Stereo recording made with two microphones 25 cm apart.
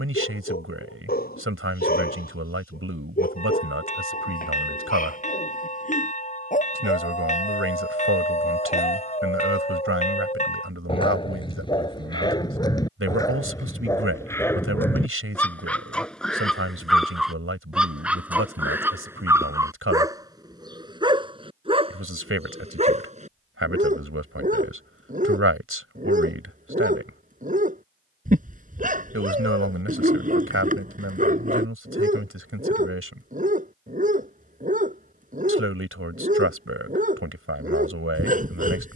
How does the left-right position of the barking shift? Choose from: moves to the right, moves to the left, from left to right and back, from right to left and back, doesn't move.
moves to the right.